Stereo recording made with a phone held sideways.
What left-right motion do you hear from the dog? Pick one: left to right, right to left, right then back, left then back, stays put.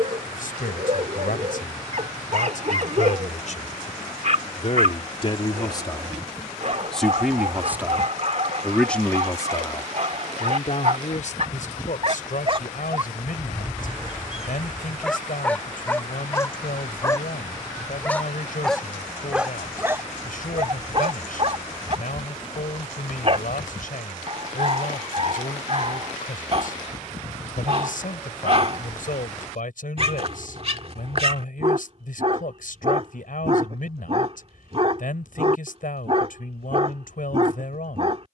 left then back.